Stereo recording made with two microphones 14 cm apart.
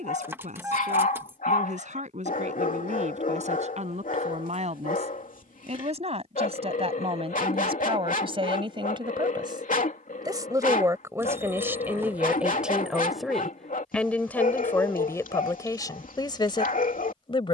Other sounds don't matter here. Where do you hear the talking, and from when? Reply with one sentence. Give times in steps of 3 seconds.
In this clip you hear the talking on the right from 0 s, in the centre from 12 s and on the left from 15 s.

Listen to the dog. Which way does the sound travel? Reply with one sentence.
You can hear the dog stay in one place.